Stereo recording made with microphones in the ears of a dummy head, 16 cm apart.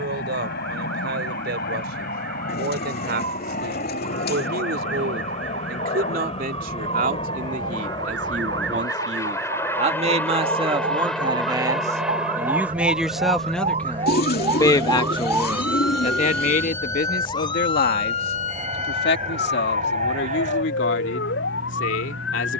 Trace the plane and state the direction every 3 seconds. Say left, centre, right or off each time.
left, left, left, centre, centre, right, right, right.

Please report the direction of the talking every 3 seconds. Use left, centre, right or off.
right, right, right, right, centre, left, left, left.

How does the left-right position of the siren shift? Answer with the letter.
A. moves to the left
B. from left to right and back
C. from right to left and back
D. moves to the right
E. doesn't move
A.